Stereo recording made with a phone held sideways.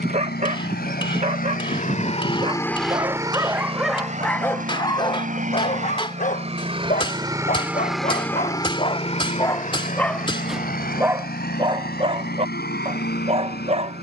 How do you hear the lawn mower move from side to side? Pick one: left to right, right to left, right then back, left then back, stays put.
right then back.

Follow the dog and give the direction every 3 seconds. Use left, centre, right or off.
right, centre, left, centre, right.